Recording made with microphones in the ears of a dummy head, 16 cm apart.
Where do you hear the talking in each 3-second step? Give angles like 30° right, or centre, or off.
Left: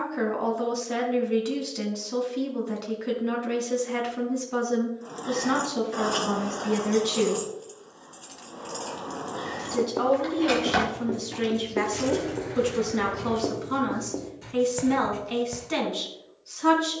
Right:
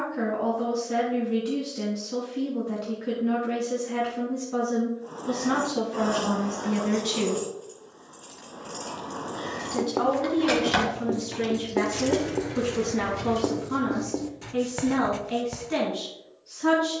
40° left, 30° left, 10° left, 10° left, 30° left, 40° left.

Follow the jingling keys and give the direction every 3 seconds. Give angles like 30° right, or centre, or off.
off, 50° left, 30° left, centre, 20° right, off.